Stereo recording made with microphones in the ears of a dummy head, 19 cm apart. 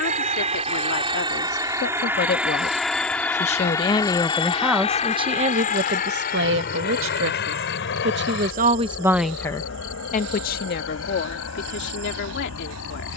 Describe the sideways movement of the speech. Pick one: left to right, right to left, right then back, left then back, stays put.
right then back.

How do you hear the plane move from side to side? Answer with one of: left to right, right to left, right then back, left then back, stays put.
right to left.